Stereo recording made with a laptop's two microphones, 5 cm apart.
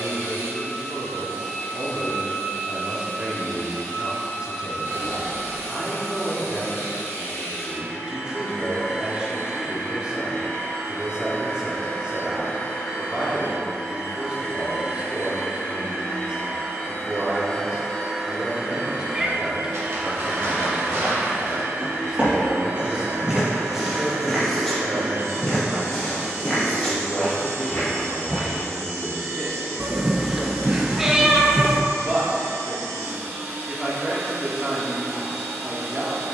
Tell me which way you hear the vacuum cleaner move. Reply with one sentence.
You can hear the vacuum cleaner move to the right.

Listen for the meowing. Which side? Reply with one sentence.
In this clip you hear the meowing in the centre.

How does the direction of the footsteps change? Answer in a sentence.
In this clip you hear the footsteps move to the left.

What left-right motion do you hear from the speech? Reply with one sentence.
You can hear the speech stay in one place.